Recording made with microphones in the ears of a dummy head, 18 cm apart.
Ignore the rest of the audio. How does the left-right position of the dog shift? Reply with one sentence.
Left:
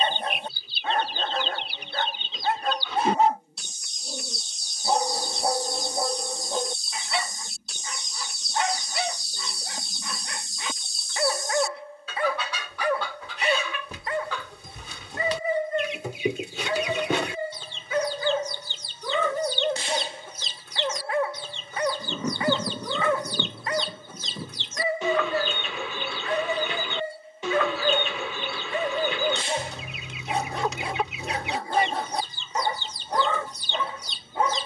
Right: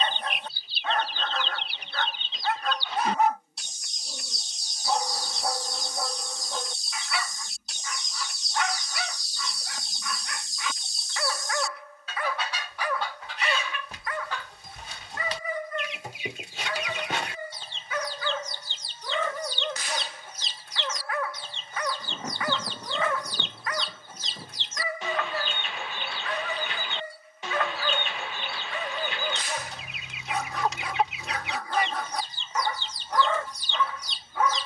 You can hear the dog stay put.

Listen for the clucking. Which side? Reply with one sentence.
In this clip you hear the clucking on the left.